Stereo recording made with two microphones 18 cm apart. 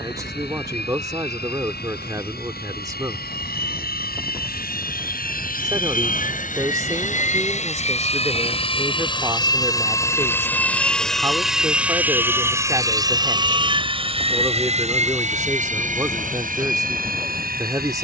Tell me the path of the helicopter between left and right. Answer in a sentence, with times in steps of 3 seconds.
In this clip you hear the helicopter on the left from 0 s, in the centre from 9 s and on the right from 12 s.